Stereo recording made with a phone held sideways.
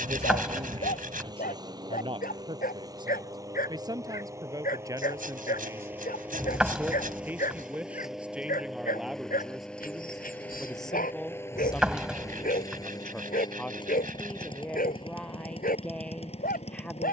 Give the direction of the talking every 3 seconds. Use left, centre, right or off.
right, right, centre, centre, centre, centre.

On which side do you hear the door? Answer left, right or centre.
centre.